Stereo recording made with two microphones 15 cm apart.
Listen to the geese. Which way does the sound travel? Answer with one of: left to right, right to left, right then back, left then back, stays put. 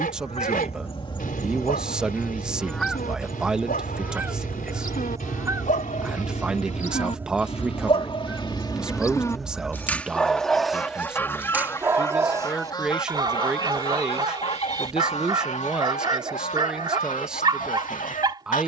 right then back.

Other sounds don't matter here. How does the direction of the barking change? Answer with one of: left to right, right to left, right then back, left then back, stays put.
left to right.